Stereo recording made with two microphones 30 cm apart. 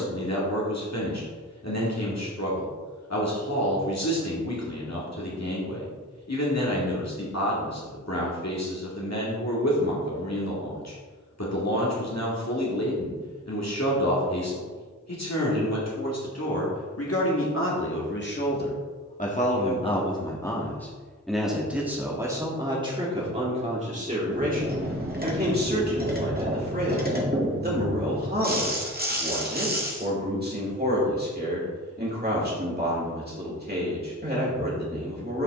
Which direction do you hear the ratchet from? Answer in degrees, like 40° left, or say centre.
30° right.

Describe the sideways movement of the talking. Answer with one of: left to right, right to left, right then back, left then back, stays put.
left to right.